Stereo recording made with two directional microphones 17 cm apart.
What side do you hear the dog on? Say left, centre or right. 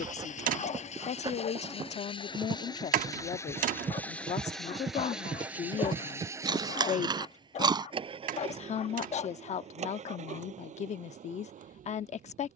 left.